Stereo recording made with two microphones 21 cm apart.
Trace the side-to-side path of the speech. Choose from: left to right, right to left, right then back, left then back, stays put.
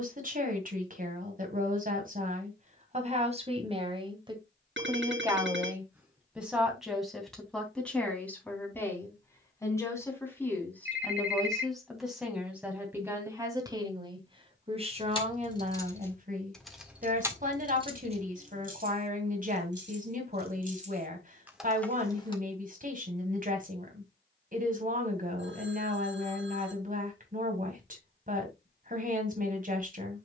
left then back.